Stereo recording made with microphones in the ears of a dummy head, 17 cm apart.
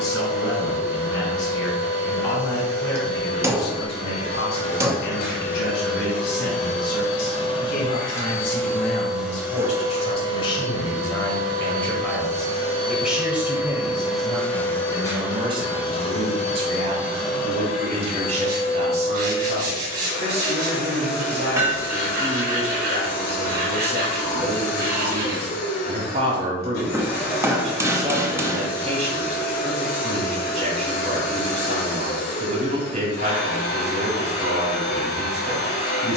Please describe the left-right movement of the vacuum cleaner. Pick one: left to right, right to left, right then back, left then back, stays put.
right then back.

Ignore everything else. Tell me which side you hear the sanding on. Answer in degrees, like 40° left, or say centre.
60° right.